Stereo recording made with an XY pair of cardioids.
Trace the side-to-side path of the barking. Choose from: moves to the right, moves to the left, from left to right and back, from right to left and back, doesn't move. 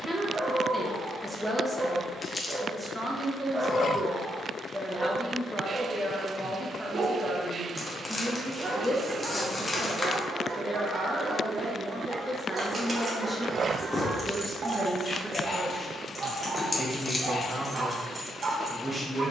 doesn't move.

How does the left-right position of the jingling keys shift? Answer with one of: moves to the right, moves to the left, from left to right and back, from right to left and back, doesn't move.
from right to left and back.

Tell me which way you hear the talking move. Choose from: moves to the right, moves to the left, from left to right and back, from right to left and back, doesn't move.
doesn't move.